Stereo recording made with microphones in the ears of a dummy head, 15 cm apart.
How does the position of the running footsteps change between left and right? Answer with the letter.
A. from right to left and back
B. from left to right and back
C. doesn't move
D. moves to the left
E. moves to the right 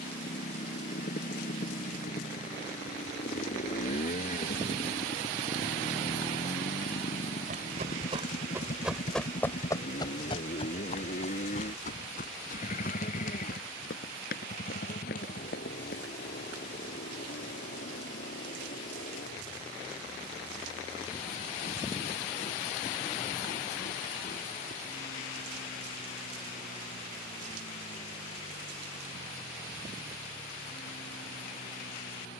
D.